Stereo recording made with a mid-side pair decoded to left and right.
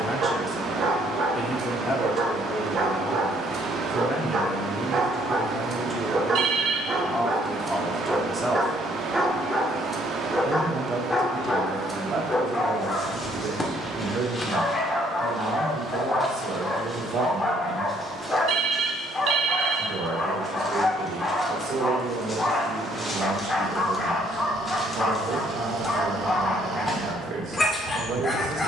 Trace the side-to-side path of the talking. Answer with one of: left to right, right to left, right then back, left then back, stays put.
left to right.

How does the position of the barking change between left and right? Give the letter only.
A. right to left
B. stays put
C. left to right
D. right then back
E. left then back
A.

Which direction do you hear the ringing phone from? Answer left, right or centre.
right.